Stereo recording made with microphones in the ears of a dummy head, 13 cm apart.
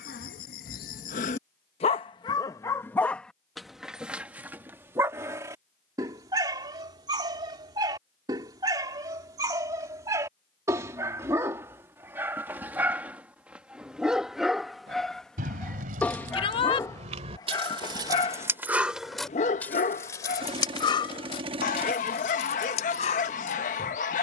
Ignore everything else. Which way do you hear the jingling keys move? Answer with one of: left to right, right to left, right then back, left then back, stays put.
right to left.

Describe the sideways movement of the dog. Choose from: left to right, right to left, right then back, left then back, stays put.
right then back.